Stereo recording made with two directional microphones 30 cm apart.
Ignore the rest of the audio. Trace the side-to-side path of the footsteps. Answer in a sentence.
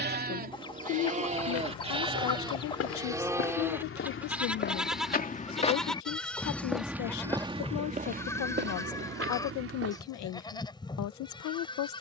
You can hear the footsteps go from the left side to the right.